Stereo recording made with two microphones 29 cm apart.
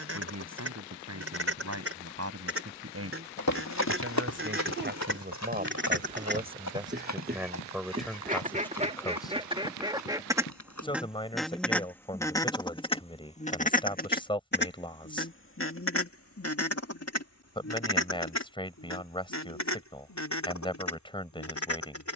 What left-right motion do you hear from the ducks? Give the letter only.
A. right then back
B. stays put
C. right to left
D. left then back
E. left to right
C.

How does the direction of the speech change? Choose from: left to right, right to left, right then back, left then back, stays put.
right to left.